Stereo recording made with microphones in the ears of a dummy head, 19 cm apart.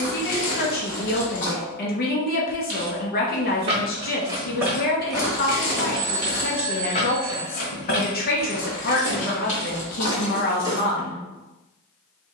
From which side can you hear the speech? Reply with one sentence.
In this clip you hear the speech on the left.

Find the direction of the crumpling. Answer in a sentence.
In this clip you hear the crumpling on the left.